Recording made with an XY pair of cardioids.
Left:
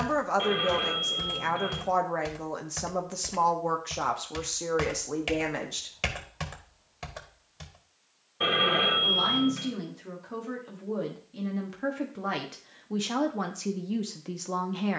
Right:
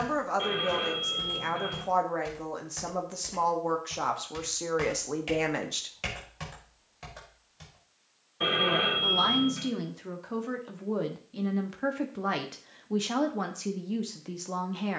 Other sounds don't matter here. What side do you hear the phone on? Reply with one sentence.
You can hear the phone on the left.